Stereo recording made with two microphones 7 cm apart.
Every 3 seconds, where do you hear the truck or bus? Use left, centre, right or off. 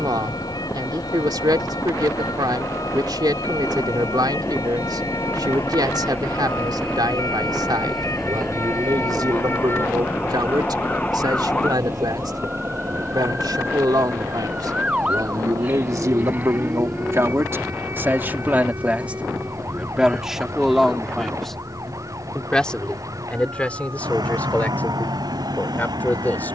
left, left, centre, right, right, right, right, right, right.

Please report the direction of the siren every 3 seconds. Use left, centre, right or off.
left, left, left, left, centre, right, right, right, right.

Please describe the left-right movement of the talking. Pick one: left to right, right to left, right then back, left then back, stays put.
right to left.